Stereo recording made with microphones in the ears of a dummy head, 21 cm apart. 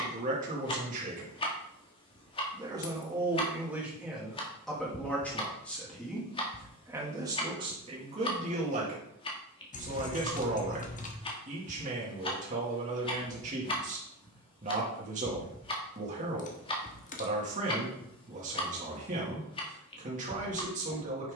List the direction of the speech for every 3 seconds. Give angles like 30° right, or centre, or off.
30° right, centre, 20° right, 30° right, 30° right, 30° right, 30° right.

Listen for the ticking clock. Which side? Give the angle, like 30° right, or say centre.
20° left.